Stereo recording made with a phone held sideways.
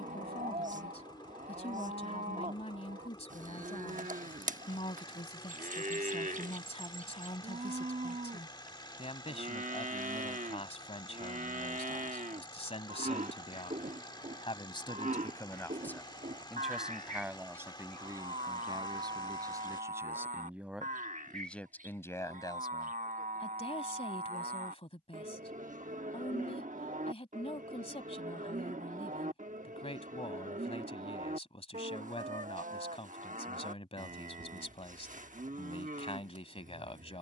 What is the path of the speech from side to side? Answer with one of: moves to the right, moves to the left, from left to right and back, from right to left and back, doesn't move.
from left to right and back.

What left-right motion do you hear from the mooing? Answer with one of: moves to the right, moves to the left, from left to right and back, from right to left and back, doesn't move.
doesn't move.